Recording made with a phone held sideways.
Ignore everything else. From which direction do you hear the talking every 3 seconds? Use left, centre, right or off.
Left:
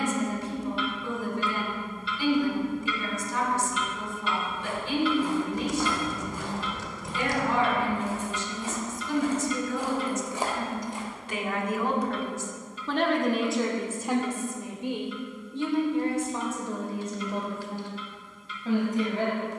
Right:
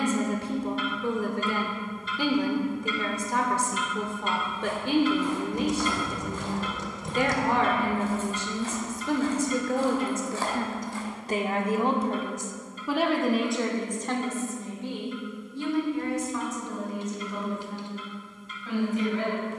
right, right, right, right, centre, left, left.